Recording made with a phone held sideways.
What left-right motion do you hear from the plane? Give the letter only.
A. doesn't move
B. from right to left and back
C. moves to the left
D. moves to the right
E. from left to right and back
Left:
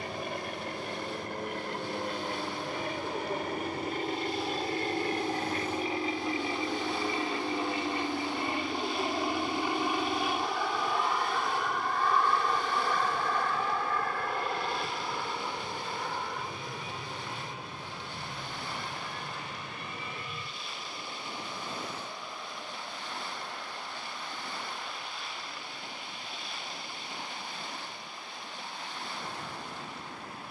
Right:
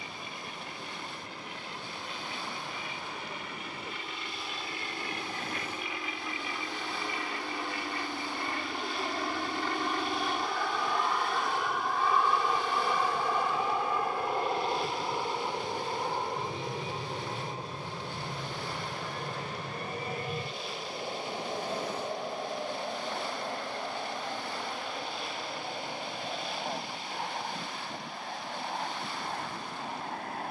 D.